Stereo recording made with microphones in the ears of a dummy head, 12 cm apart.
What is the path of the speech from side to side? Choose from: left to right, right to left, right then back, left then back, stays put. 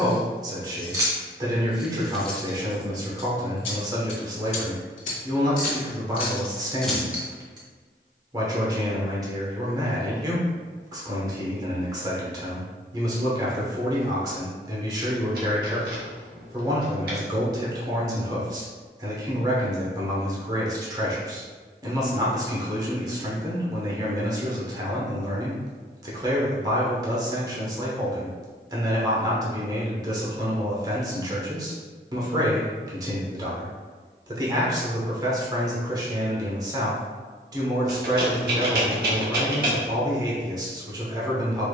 stays put.